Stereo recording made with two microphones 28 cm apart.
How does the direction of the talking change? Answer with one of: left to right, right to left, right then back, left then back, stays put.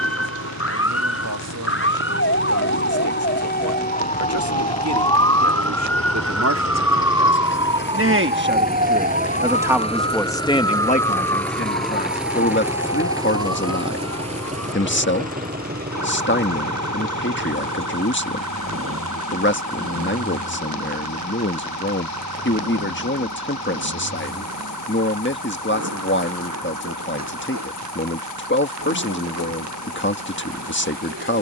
right to left.